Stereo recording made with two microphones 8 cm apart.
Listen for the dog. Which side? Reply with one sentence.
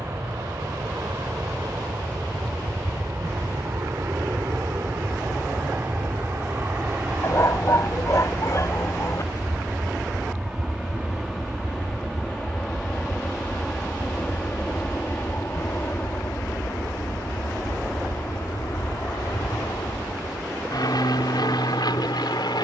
You can hear the dog on the left.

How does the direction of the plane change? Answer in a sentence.
In this clip you hear the plane go from the right side to the left.